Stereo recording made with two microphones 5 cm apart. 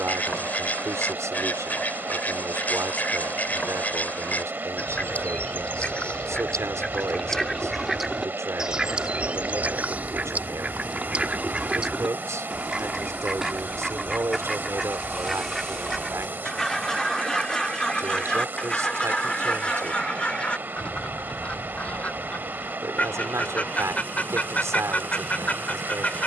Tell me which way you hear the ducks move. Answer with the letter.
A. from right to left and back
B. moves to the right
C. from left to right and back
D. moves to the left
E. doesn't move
C.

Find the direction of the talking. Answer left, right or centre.
right.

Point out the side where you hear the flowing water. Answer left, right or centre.
right.